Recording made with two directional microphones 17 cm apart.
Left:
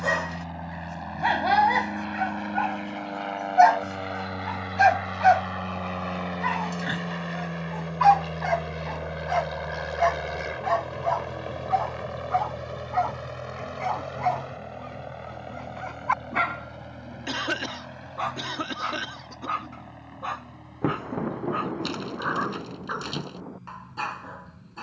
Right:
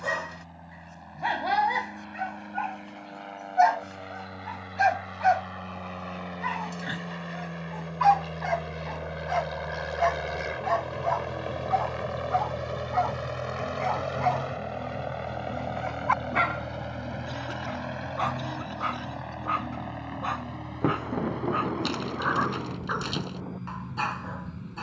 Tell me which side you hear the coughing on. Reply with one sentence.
In this clip you hear the coughing on the left.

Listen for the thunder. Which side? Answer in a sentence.
In this clip you hear the thunder in the centre.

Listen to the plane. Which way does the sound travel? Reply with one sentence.
You can hear the plane travel towards the right.